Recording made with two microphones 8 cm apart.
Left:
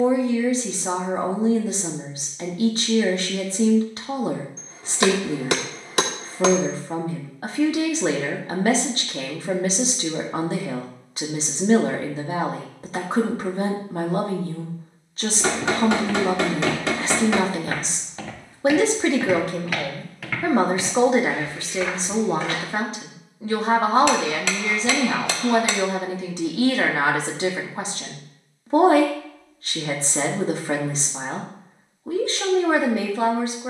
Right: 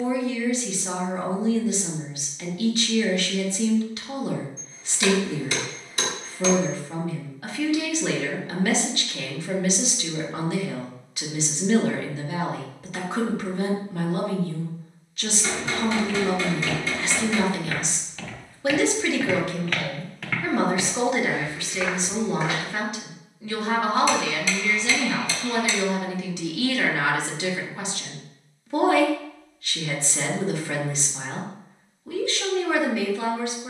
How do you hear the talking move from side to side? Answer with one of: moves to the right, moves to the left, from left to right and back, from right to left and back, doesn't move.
doesn't move.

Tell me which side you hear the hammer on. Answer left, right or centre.
left.